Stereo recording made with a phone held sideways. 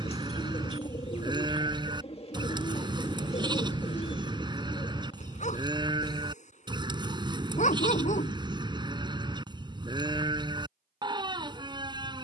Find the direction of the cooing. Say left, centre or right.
left.